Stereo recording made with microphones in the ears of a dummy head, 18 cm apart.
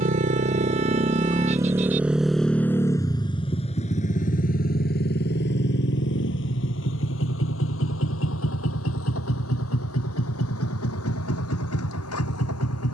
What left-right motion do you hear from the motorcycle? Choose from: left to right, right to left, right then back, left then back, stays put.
right to left.